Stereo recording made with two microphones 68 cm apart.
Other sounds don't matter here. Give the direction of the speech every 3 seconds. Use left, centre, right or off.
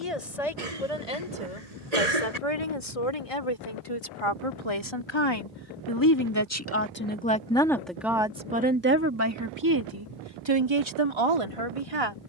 left, left, centre, right.